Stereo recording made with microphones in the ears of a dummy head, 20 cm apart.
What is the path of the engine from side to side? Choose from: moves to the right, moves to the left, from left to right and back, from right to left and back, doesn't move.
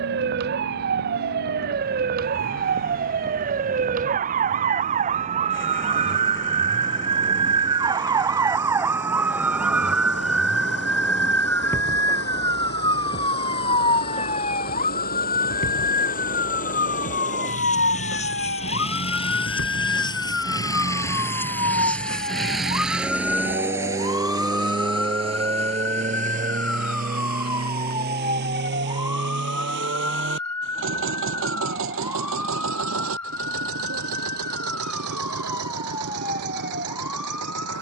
moves to the right.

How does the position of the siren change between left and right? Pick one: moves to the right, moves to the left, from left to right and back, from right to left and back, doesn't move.
moves to the left.